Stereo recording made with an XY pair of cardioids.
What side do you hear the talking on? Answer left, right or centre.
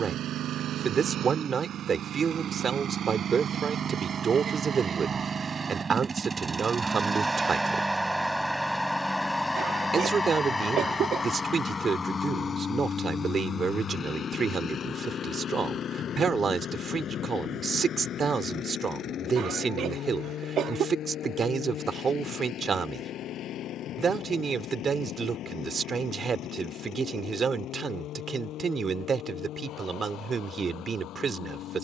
right.